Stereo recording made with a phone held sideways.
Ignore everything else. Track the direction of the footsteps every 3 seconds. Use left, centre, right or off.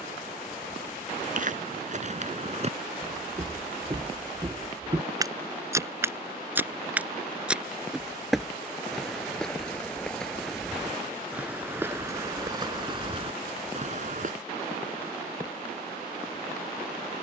right, right, centre, centre, right, off.